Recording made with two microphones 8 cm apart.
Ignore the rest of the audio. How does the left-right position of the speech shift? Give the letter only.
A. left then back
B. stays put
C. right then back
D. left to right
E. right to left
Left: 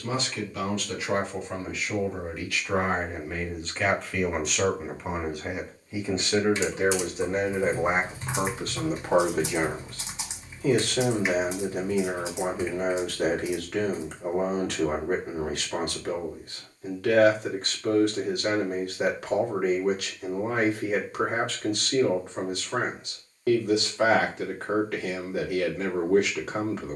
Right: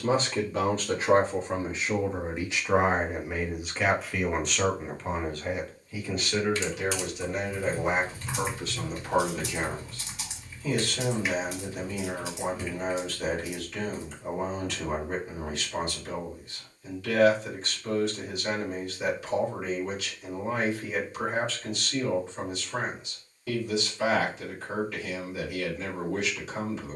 E.